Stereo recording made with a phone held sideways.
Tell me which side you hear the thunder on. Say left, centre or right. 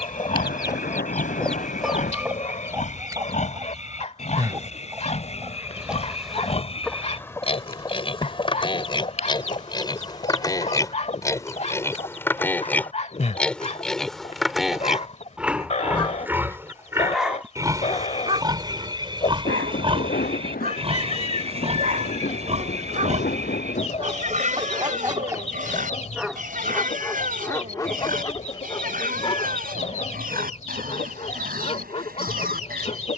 left.